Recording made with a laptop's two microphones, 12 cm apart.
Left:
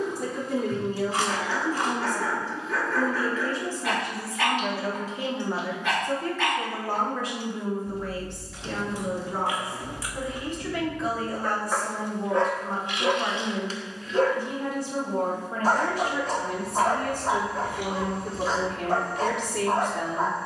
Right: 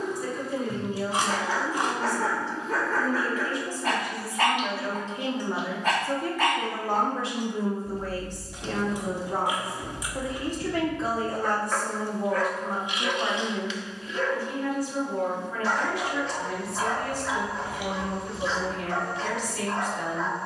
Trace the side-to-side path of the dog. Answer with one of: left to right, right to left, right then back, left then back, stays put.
right to left.